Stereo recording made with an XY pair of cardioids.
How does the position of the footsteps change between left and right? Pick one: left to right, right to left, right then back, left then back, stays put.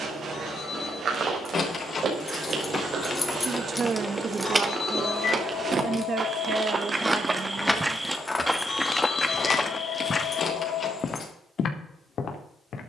right to left.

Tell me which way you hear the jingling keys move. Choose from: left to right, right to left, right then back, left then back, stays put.
right then back.